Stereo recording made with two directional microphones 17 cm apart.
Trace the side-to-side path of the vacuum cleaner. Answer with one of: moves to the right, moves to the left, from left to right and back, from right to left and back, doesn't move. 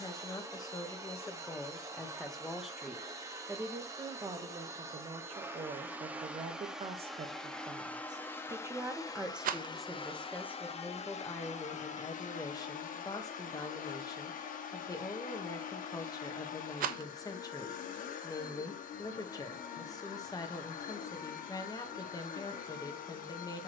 moves to the left.